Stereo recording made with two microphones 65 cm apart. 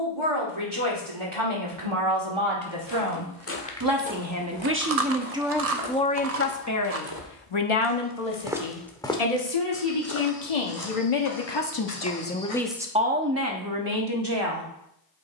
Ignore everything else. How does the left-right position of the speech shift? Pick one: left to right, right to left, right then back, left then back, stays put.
left then back.